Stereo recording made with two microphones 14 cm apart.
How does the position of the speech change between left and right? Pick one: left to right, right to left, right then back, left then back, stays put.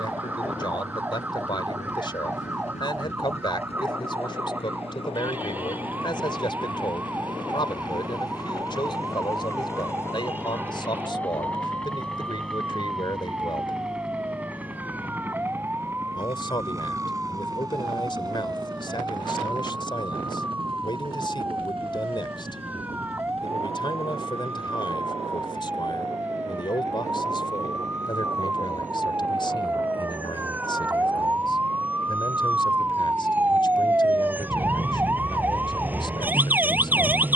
stays put.